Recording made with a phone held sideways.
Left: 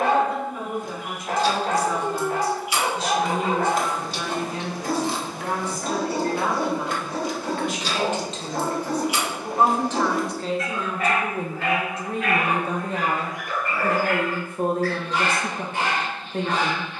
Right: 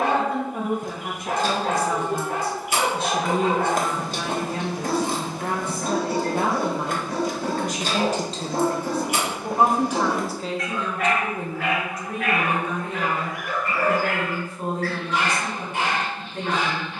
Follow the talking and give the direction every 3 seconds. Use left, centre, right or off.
right, right, right, centre, left, left.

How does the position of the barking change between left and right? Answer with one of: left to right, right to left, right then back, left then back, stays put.
stays put.